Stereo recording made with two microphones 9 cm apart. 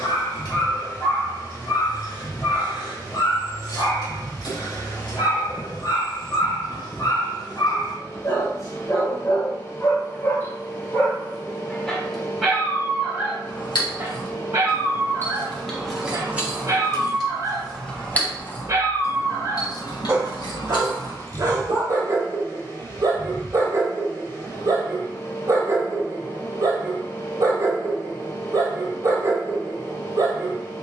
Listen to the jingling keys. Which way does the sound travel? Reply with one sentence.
In this clip you hear the jingling keys go right and come back.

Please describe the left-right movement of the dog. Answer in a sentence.
In this clip you hear the dog move to the right.